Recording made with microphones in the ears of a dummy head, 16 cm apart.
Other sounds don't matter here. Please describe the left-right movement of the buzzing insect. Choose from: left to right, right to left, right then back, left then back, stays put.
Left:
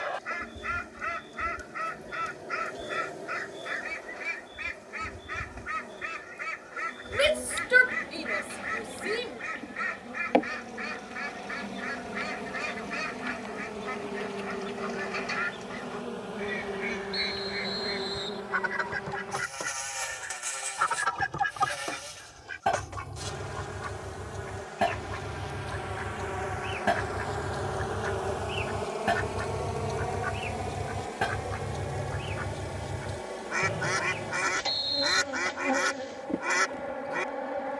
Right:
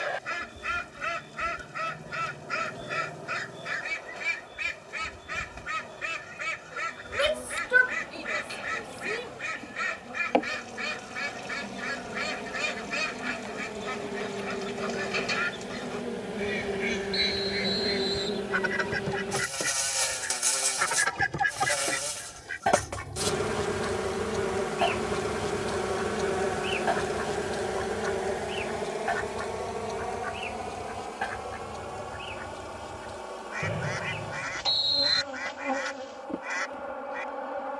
right then back.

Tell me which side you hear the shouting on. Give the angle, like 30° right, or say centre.
20° left.